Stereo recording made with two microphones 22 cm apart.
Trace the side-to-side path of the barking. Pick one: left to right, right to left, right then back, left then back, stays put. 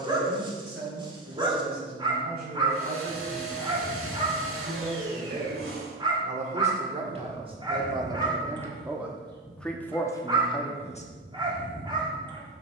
stays put.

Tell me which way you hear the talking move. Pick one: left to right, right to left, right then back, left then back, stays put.
right to left.